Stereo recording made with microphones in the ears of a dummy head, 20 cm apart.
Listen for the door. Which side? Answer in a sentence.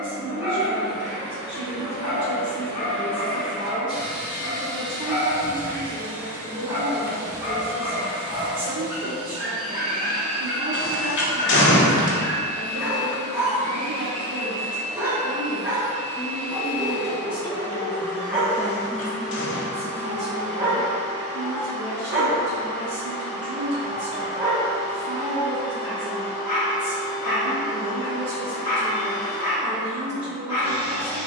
You can hear the door on the left.